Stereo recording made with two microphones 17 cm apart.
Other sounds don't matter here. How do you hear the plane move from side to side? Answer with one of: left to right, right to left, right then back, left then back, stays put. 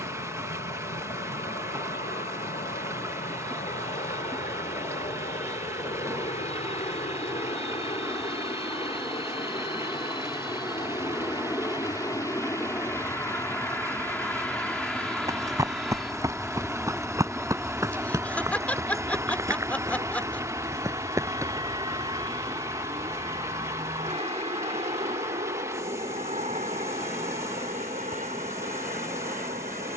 left to right.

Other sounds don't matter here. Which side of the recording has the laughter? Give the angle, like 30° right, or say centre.
10° left.